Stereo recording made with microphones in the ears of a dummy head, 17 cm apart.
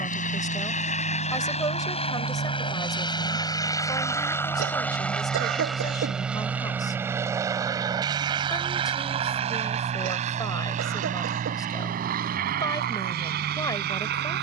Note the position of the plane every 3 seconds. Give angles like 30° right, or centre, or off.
40° left, 10° left, 20° right, 40° right, 50° right.